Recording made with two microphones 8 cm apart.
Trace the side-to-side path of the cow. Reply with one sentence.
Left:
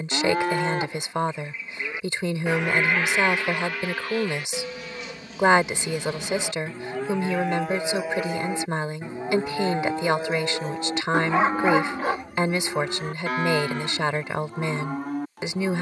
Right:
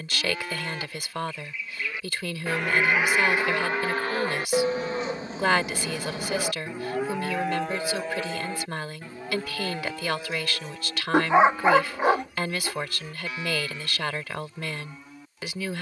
In this clip you hear the cow move from left to right and back again.